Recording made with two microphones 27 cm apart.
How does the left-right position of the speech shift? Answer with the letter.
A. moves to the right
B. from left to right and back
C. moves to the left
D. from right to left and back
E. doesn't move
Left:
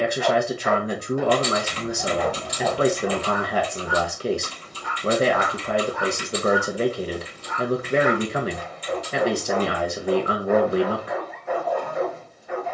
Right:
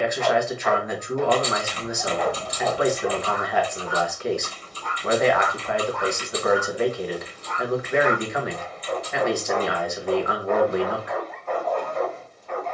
E.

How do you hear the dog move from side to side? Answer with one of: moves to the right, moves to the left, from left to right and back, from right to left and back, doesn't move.
doesn't move.